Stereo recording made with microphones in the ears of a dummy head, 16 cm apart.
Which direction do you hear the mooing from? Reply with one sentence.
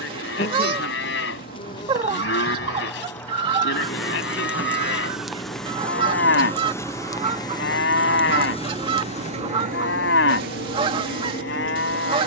You can hear the mooing on the left.